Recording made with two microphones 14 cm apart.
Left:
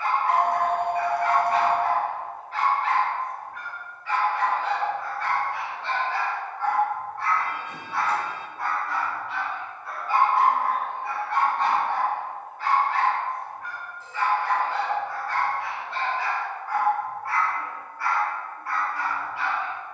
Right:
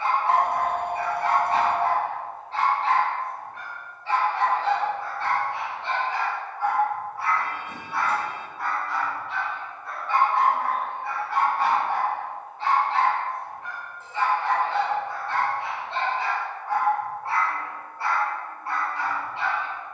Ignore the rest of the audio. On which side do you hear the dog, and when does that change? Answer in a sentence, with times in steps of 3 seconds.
In this clip you hear the dog on the right from 0 s, in the centre from 6 s and on the right from 12 s.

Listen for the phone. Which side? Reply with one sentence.
In this clip you hear the phone on the right.